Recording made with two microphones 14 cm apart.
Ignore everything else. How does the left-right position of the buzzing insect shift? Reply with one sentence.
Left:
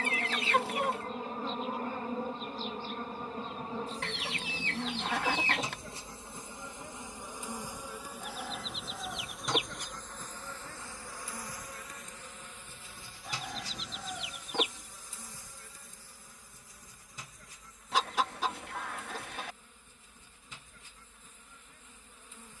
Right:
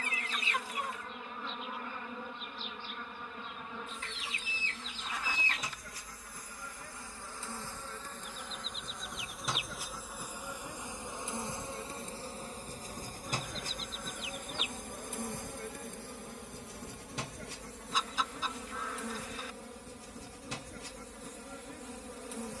In this clip you hear the buzzing insect move to the right.